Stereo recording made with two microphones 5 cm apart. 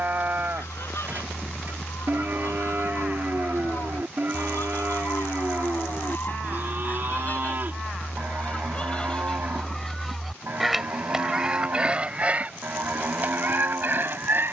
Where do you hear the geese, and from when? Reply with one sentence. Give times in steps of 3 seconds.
In this clip you hear the geese on the left from 0 s, in the centre from 9 s and on the right from 12 s.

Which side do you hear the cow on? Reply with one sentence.
In this clip you hear the cow on the right.